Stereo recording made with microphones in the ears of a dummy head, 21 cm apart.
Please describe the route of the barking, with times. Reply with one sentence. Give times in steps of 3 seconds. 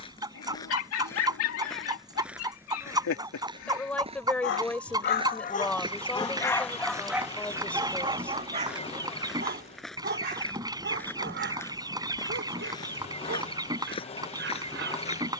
In this clip you hear the barking on the left from 0 s, in the centre from 6 s and on the right from 9 s.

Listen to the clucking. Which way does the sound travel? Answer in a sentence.
In this clip you hear the clucking stay put.